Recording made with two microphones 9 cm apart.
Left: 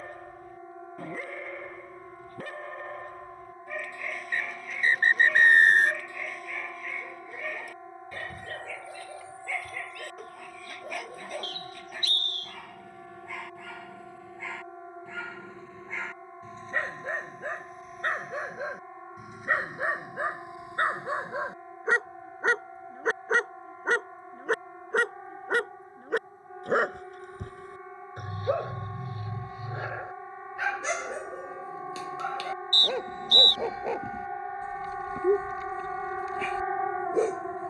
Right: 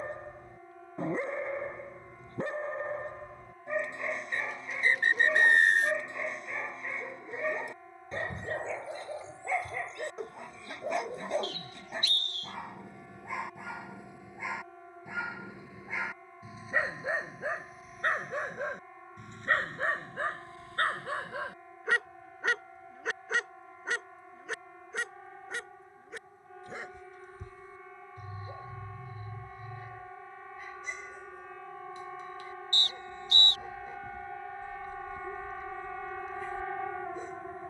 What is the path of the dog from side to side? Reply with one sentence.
In this clip you hear the dog move to the left.